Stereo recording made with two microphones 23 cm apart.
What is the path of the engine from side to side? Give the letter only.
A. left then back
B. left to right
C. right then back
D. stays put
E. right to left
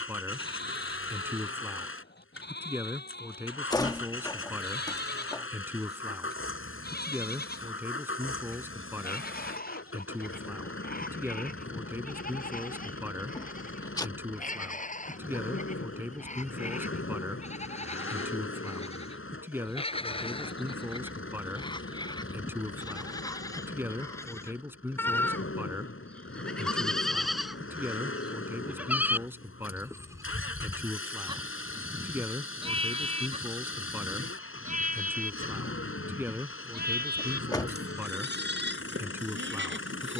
D.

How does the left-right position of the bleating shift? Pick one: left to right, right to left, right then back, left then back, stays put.
left to right.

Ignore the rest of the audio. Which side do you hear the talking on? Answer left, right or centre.
centre.